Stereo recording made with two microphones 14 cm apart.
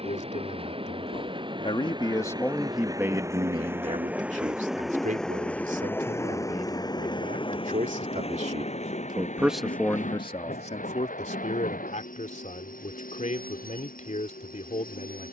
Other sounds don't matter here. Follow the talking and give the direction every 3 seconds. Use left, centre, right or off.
left, right, right, left, left.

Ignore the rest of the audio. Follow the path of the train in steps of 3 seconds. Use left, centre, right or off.
right, centre, left, left, left.